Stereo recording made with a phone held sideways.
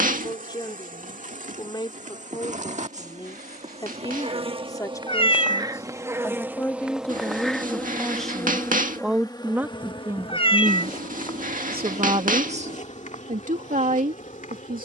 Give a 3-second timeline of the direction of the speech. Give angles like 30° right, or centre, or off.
30° left, 20° left, 10° left, 20° right, 60° right.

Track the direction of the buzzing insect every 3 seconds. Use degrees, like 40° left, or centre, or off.
60° right, 40° right, centre, 40° left, 60° left.